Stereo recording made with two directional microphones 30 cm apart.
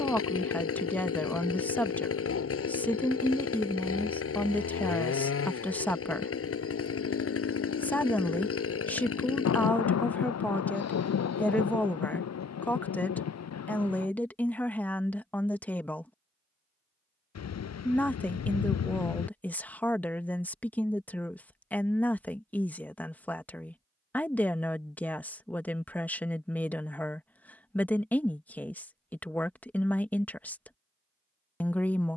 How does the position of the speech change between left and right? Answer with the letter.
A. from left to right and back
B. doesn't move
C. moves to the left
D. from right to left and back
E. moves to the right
B.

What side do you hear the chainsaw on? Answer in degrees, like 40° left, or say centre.
50° left.